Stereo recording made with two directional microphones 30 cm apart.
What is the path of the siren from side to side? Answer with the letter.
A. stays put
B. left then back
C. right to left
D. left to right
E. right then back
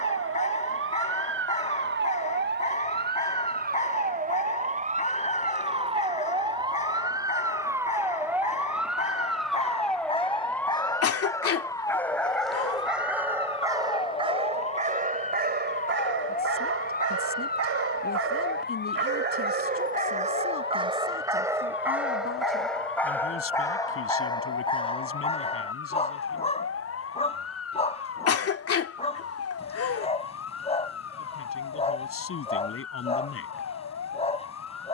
C.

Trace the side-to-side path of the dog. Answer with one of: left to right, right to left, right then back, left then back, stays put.
right then back.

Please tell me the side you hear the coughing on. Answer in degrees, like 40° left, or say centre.
50° left.